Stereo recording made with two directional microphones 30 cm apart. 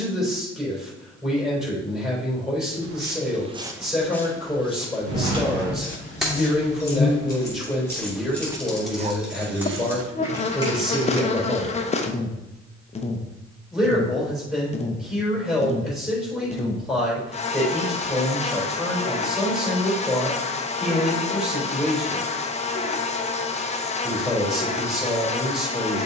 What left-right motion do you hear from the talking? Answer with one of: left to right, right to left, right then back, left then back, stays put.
stays put.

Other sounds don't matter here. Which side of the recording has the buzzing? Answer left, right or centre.
left.